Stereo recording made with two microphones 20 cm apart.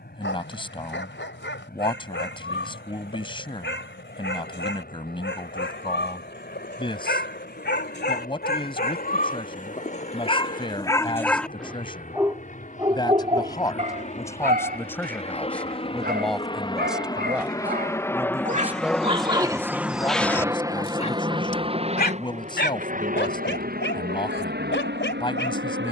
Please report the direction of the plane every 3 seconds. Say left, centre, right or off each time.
left, left, left, left, left, left, centre, right, right.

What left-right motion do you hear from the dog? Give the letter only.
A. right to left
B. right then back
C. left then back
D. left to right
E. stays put
B.